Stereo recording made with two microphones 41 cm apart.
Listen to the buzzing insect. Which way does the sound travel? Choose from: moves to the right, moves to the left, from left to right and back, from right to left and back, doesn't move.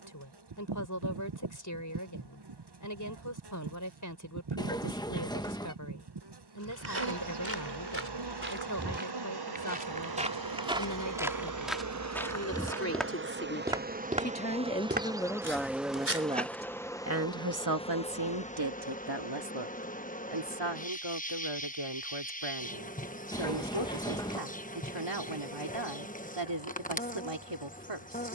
moves to the left.